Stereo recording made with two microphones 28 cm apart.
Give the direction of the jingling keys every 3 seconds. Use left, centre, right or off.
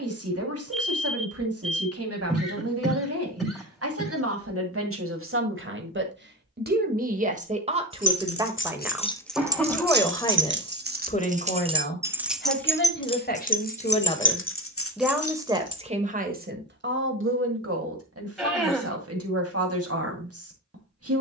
off, off, left, right, left, left, off.